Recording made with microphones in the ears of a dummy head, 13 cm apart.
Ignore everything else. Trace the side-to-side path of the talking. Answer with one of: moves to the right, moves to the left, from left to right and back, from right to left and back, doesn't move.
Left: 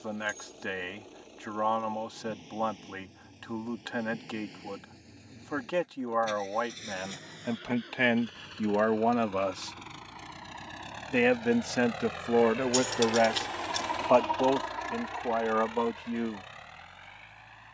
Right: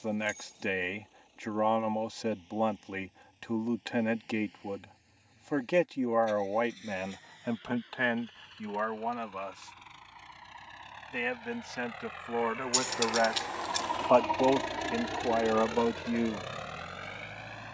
from right to left and back.